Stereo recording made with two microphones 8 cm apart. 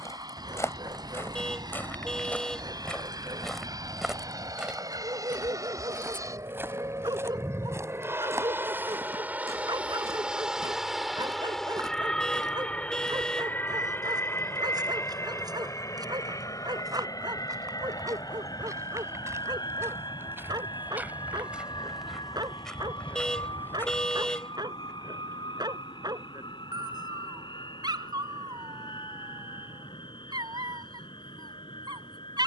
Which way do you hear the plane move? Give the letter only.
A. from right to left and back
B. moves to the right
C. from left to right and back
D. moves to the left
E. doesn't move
D.